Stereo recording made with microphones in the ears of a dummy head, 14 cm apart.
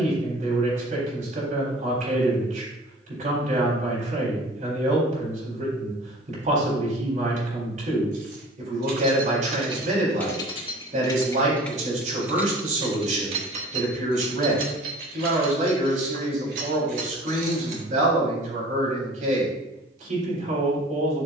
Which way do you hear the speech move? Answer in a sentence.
You can hear the speech stay put.